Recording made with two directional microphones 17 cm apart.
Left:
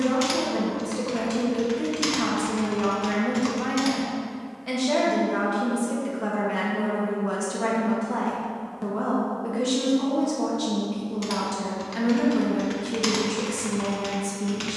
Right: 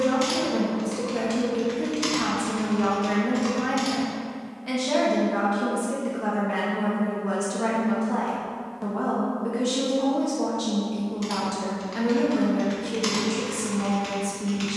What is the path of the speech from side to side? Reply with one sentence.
In this clip you hear the speech stay in one place.